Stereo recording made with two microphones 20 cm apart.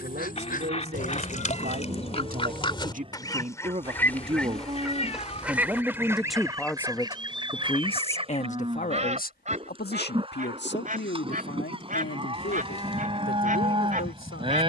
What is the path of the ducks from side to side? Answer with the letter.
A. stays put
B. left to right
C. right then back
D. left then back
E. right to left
B.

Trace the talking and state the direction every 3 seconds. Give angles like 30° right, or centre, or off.
50° right, 30° right, 20° left, 60° left, 70° left.